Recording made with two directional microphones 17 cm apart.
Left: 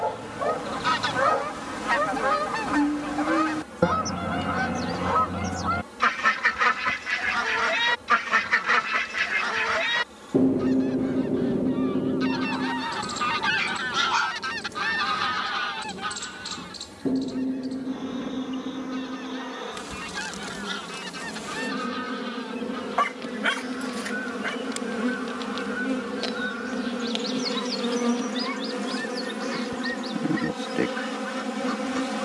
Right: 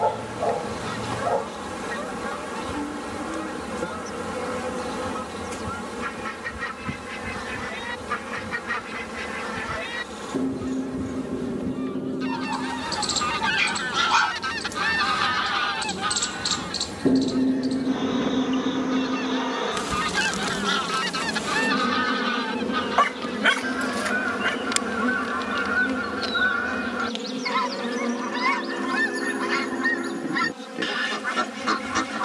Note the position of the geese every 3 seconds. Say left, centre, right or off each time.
left, left, left, left, centre, right, right, right, right, right, right.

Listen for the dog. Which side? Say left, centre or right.
right.